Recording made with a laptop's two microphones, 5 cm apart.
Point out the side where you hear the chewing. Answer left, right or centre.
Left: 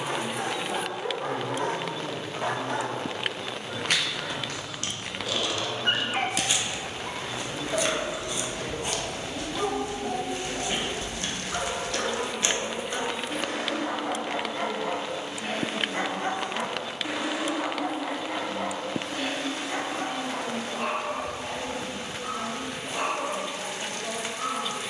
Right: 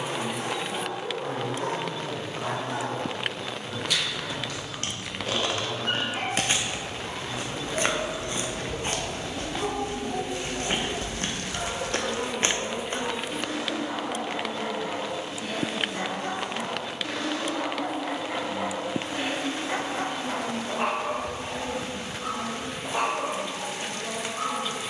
right.